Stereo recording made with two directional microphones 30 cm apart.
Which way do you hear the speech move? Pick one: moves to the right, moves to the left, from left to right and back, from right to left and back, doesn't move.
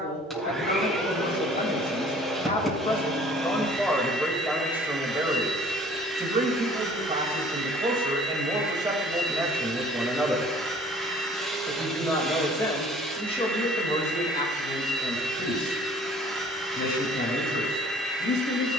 from left to right and back.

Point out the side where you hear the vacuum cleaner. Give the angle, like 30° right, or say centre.
centre.